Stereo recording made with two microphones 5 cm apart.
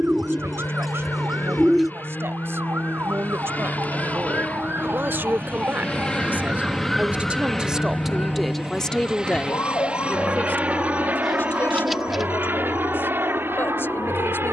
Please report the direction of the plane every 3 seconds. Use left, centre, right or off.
left, left, centre, right, right.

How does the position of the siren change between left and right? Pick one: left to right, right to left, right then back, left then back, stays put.
right to left.